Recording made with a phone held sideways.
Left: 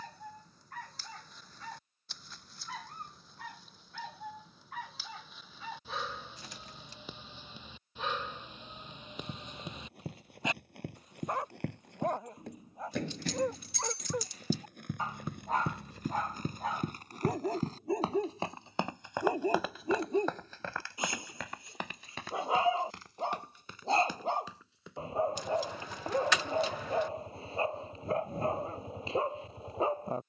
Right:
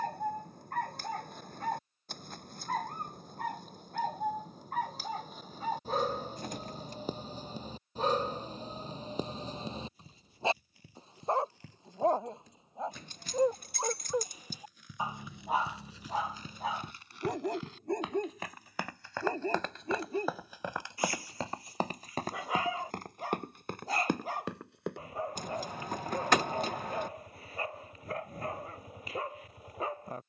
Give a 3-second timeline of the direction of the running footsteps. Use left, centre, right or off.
off, off, off, left, left, left, centre, right, right, off.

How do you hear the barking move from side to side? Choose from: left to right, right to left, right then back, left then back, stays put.
right to left.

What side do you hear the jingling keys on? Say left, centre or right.
right.